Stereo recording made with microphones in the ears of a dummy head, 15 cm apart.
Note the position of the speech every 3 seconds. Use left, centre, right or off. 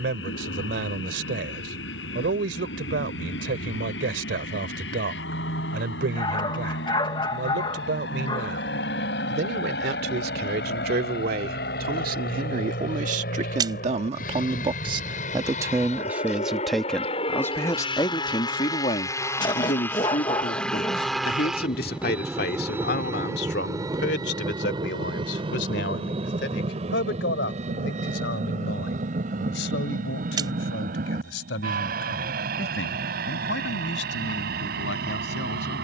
right, right, right, right, right, centre, left, left, left, left, left, left.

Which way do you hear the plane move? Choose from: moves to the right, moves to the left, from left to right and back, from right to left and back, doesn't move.
moves to the right.